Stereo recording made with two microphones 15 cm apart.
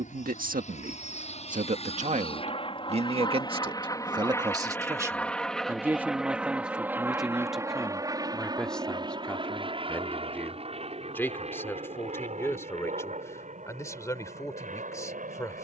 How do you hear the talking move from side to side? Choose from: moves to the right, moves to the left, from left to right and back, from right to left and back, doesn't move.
moves to the left.